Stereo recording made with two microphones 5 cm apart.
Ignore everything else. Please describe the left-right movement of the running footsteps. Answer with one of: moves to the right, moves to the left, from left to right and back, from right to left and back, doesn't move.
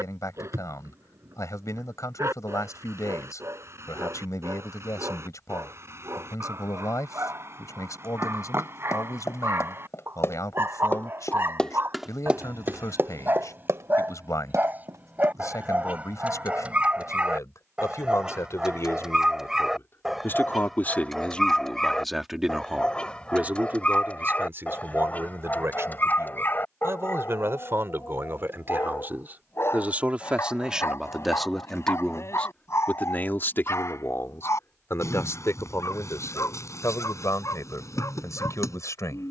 moves to the right.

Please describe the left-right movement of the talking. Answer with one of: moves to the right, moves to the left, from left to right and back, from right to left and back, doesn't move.
from left to right and back.